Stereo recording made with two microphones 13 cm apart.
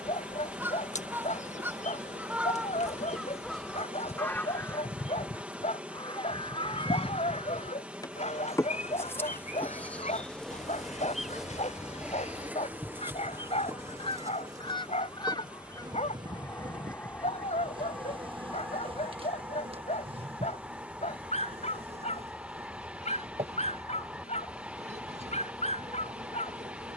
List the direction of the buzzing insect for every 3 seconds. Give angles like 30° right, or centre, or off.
60° left, 50° left, 30° left, 10° left, 20° right, 30° right, 40° right, 50° right, 60° right.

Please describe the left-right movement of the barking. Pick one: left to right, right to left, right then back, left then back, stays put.
stays put.